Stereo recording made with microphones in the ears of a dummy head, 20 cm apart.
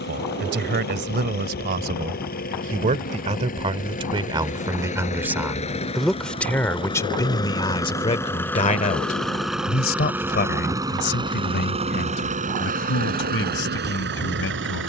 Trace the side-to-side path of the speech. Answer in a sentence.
In this clip you hear the speech travel towards the left.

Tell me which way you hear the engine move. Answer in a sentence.
In this clip you hear the engine travel towards the right.